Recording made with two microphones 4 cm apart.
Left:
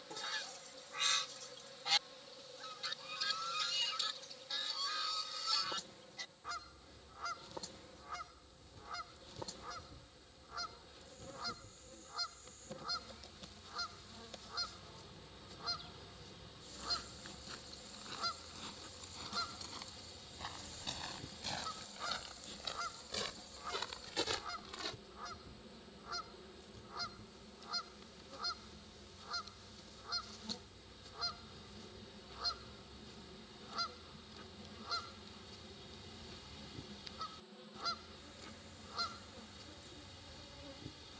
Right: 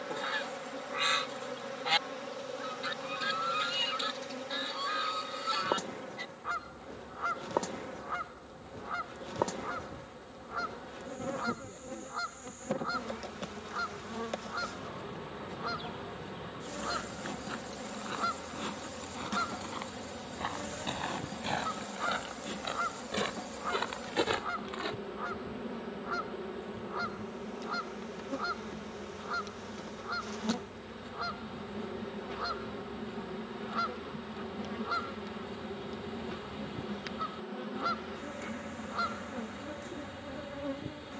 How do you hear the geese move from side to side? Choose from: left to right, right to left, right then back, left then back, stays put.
stays put.